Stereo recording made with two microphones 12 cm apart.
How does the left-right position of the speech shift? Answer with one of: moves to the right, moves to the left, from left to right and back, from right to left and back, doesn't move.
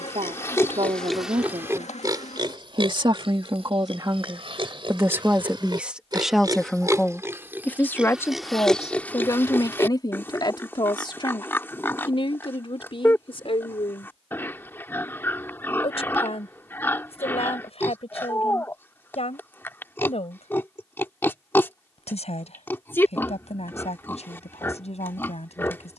moves to the left.